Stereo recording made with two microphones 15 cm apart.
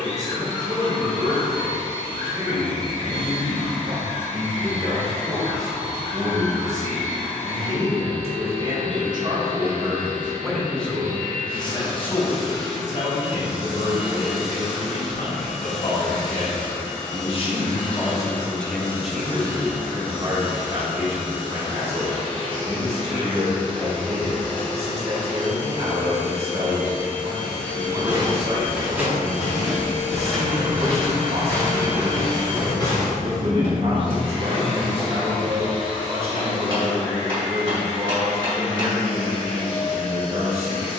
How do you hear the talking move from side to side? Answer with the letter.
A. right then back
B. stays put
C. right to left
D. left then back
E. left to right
D.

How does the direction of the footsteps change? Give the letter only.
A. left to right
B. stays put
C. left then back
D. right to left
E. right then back
D.